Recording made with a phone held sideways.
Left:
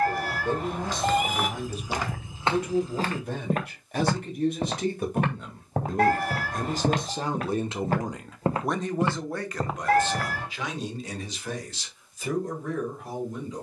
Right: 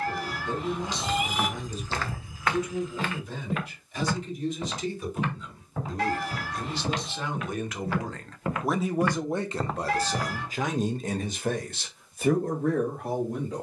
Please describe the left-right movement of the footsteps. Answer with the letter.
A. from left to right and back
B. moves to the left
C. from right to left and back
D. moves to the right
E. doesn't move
C.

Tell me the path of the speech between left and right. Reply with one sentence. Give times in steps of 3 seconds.
In this clip you hear the speech on the left from 0 s and on the right from 9 s.